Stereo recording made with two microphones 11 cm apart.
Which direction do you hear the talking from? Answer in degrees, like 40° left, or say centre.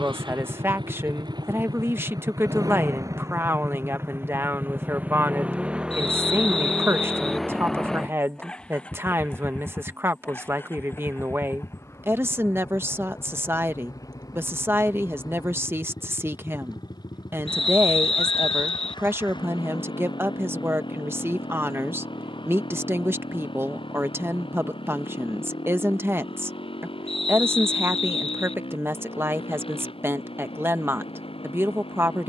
20° right.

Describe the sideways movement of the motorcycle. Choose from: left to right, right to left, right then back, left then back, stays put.
right to left.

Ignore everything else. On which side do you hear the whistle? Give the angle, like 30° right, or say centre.
60° left.